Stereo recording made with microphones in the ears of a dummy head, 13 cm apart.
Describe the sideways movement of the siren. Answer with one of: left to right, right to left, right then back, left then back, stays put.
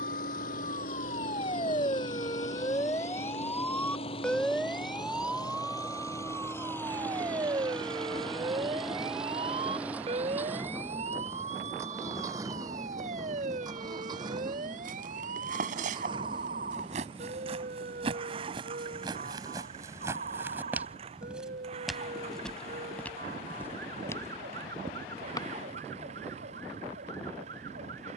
left to right.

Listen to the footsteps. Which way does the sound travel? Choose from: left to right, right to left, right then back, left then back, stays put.
right to left.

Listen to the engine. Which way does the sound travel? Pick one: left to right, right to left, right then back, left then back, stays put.
left to right.